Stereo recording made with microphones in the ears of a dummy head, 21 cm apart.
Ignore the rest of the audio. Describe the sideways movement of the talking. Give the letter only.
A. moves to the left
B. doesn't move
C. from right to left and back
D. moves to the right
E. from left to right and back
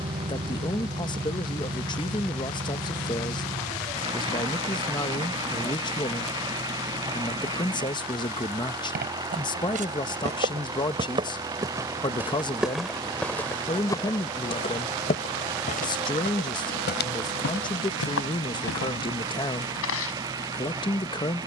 B.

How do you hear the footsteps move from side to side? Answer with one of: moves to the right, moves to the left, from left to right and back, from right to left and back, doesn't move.
moves to the left.